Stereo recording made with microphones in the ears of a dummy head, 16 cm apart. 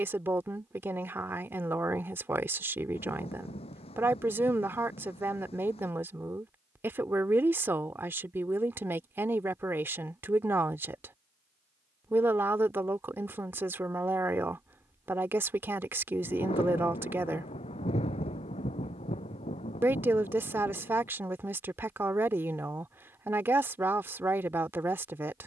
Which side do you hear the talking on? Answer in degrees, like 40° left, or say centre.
10° right.